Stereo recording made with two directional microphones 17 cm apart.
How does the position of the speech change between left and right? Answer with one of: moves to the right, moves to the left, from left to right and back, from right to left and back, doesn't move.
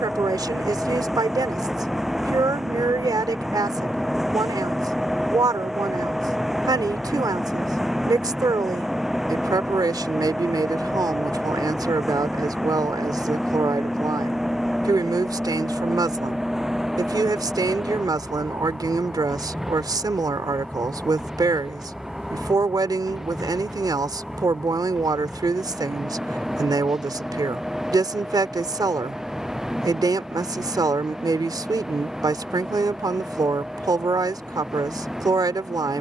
doesn't move.